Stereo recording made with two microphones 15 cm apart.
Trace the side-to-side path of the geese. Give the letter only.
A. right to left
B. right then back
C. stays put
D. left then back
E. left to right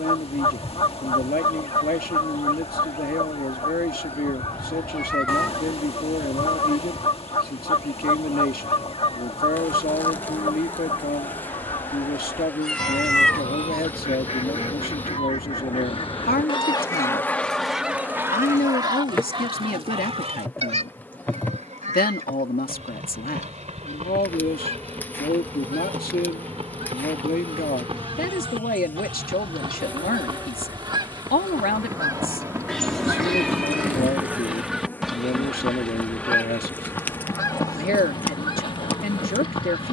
B.